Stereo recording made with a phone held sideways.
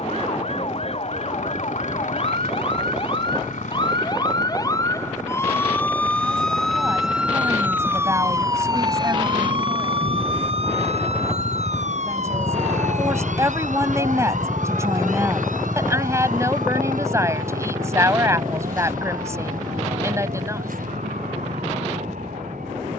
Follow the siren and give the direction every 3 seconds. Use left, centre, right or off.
left, left, centre, right, right, right, right, right.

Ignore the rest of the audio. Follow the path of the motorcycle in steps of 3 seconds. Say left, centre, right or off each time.
left, left, left, left, centre, right, right, right.